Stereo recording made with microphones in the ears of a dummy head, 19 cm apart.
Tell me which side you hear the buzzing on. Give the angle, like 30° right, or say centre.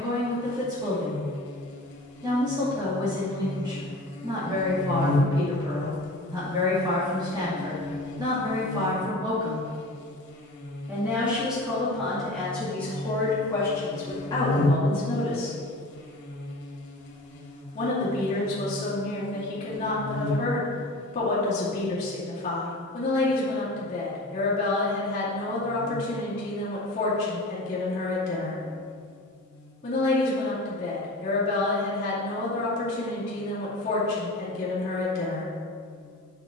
50° left.